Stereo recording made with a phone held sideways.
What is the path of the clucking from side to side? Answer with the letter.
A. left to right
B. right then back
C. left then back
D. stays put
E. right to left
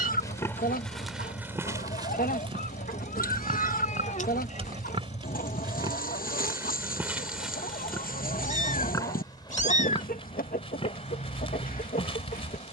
D.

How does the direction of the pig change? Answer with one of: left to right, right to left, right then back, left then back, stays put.
right then back.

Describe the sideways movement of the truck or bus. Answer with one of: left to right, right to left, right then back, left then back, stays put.
stays put.